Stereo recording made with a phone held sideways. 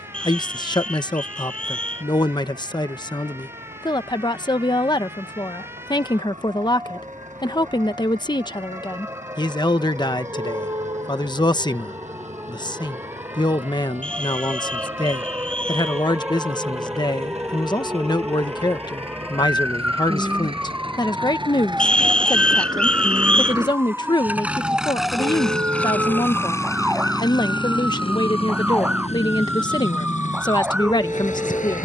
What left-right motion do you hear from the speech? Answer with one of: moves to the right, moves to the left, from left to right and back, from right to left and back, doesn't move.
doesn't move.